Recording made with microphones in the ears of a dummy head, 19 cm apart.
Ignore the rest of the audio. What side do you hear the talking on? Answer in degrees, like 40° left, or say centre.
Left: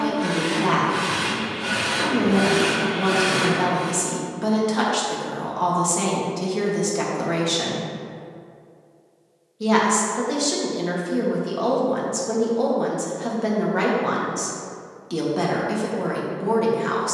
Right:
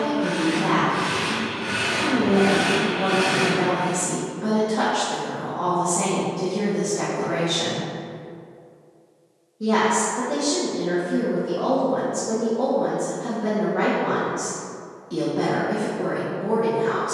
70° left.